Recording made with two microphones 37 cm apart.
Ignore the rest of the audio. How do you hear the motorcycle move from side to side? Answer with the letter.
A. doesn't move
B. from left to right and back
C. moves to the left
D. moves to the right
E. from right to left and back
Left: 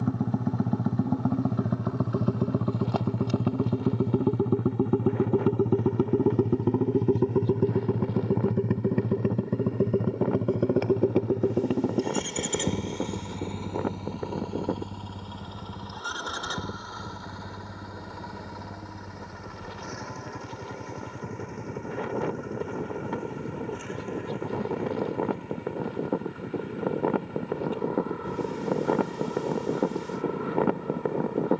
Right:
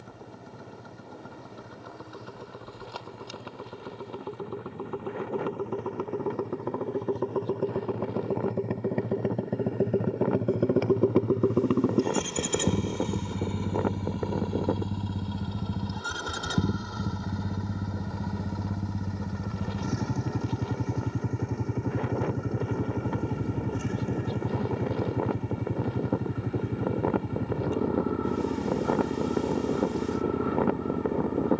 D.